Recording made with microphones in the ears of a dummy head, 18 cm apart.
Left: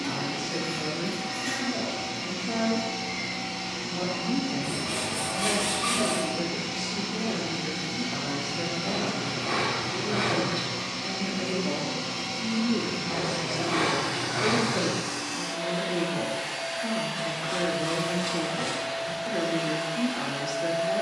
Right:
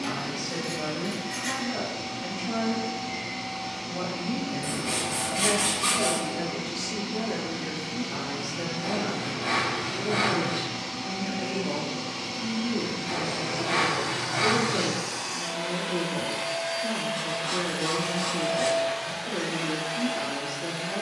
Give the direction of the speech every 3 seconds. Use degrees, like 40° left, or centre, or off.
50° right, 40° right, 30° right, 10° right, 30° left, 40° left, 40° left.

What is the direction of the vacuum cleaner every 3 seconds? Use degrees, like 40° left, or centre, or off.
50° left, 50° left, 40° left, 20° left, centre, 40° right, 60° right.